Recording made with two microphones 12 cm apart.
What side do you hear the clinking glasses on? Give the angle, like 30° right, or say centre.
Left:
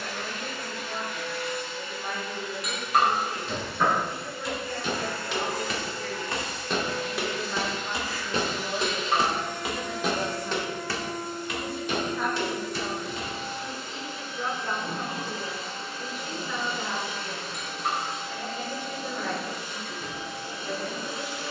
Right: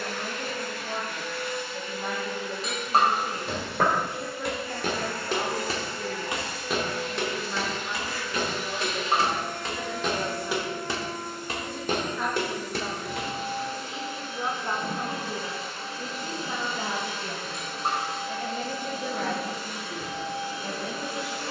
30° right.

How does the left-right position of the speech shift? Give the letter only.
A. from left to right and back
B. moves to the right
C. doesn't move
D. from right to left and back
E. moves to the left
D.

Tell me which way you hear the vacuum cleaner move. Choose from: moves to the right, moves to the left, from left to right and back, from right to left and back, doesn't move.
doesn't move.